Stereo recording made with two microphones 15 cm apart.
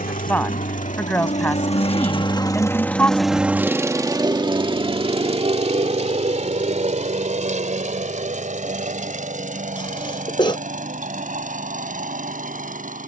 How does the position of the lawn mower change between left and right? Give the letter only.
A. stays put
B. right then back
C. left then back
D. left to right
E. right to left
D.